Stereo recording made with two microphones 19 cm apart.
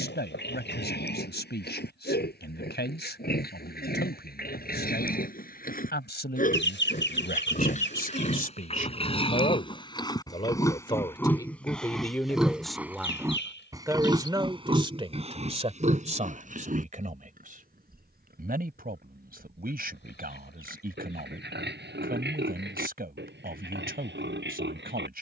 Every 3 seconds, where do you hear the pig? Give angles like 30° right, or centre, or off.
60° left, 50° left, 40° left, 20° left, 20° right, 40° right, 60° right, 70° right, 70° right.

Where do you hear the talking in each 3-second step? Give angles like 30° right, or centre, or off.
70° left, 70° left, 60° left, 30° left, 10° right, 40° right, 50° right, 50° right, 50° right.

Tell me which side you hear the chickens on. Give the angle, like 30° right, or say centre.
80° left.